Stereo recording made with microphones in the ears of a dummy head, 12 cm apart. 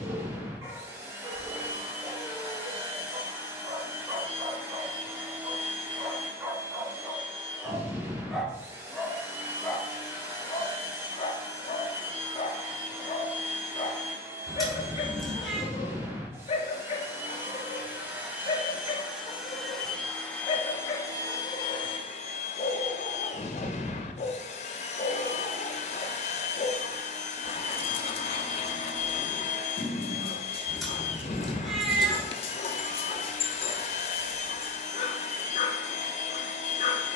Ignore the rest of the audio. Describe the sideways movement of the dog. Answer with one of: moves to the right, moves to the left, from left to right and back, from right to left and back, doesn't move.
moves to the left.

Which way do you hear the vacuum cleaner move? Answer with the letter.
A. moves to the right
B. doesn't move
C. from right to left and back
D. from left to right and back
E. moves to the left
E.